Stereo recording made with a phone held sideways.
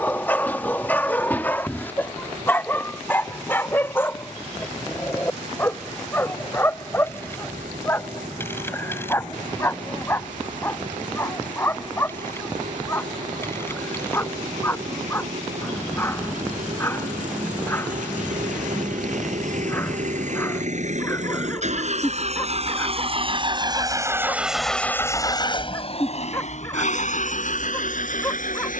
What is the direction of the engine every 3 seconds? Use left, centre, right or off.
right, right, right, right, right, right, right, right, left, left.